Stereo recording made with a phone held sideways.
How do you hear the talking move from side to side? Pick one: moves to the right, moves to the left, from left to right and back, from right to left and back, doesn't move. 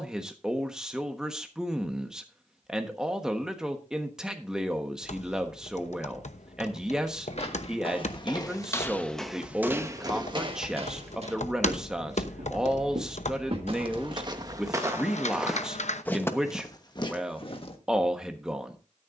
doesn't move.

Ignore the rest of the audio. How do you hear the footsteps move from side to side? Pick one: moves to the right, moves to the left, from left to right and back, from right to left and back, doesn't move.
from left to right and back.